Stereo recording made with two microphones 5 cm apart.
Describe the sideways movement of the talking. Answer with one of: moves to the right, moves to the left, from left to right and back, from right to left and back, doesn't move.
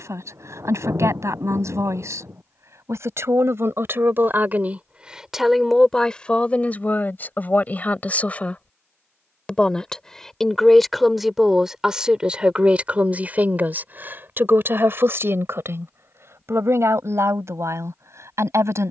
from right to left and back.